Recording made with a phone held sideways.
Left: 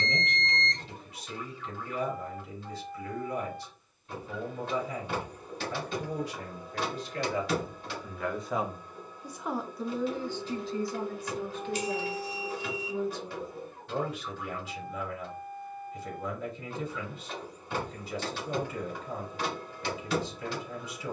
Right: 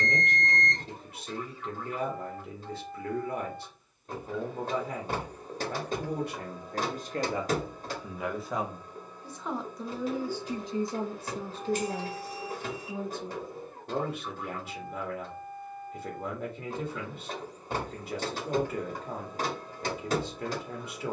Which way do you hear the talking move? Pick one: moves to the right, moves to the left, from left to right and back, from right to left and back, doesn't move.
from right to left and back.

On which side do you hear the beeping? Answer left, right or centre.
right.